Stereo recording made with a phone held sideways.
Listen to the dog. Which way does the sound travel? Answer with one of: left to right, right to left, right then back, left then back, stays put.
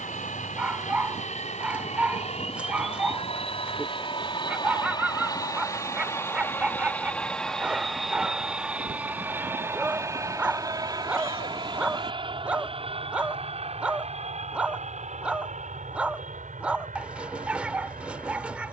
stays put.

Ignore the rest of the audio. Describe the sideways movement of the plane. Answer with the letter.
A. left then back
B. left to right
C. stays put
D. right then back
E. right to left
B.